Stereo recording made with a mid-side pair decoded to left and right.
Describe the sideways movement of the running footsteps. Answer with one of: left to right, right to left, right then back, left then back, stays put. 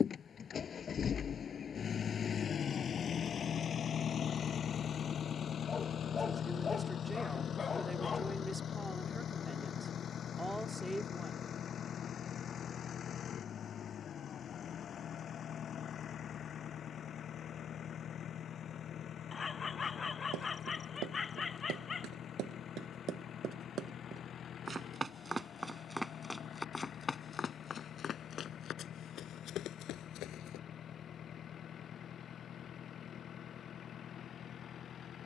right to left.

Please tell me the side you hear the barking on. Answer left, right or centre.
left.